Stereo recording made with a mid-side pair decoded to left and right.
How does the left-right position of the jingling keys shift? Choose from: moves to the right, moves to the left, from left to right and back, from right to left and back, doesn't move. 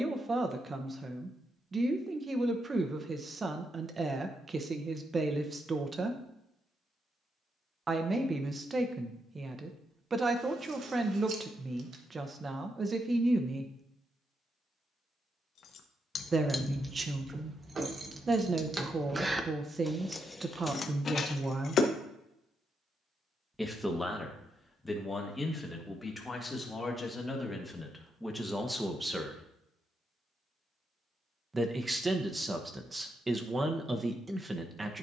from left to right and back.